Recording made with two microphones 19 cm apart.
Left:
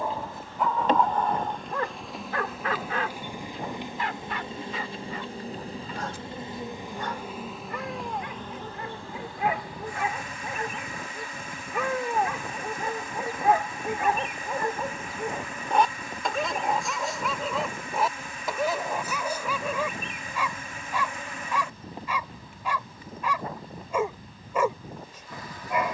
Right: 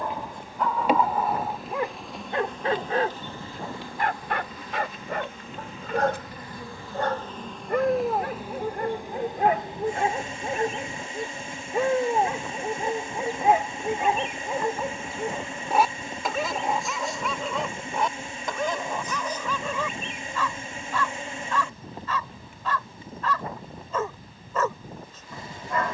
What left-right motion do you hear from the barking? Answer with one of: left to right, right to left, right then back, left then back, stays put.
right then back.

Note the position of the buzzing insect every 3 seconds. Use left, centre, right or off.
centre, left, centre, right, right, right, right, right, right.